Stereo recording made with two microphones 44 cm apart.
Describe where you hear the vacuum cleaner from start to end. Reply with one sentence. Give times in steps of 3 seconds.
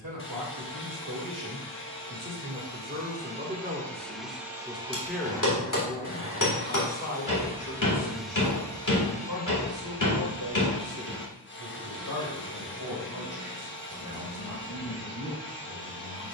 In this clip you hear the vacuum cleaner on the left from 0 s, in the centre from 3 s and on the left from 9 s.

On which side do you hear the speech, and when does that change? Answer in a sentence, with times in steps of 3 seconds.
You can hear the speech on the right from 0 s, in the centre from 3 s and on the left from 6 s.